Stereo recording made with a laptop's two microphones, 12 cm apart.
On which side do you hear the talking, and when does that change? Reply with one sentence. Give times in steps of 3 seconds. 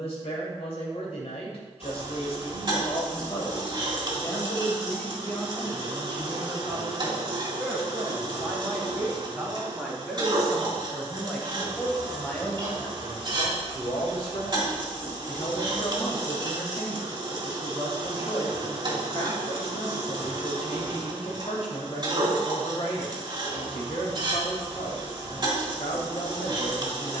In this clip you hear the talking on the left from 0 s, in the centre from 6 s and on the left from 12 s.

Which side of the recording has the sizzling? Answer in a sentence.
You can hear the sizzling on the right.